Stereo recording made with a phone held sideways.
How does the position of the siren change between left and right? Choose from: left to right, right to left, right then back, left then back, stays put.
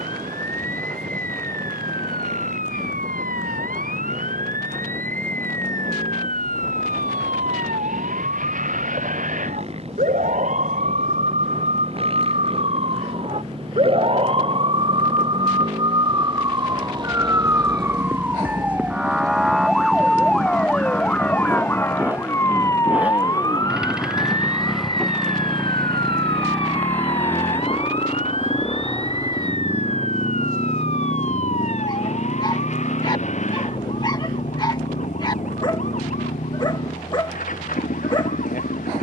right to left.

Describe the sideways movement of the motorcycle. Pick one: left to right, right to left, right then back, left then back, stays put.
right to left.